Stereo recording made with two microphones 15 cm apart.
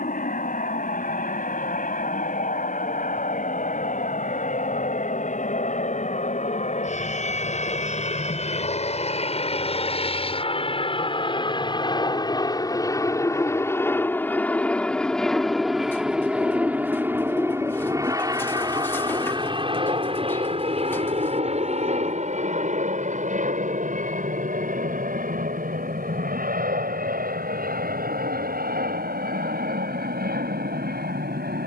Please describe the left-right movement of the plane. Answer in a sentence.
You can hear the plane travel towards the right.